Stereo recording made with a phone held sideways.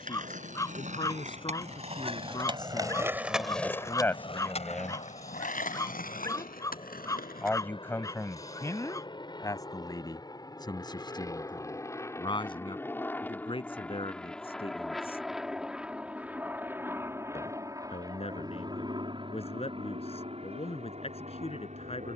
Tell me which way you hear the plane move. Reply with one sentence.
You can hear the plane go from the left side to the right.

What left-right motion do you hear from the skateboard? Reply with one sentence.
In this clip you hear the skateboard go from the right side to the left.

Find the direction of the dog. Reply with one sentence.
You can hear the dog on the left.